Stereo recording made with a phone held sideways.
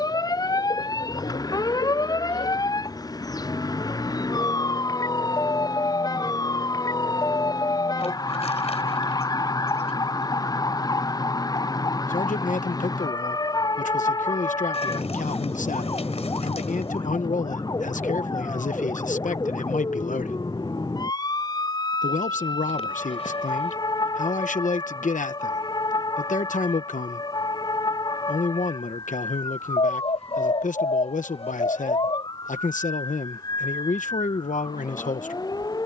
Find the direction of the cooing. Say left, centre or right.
left.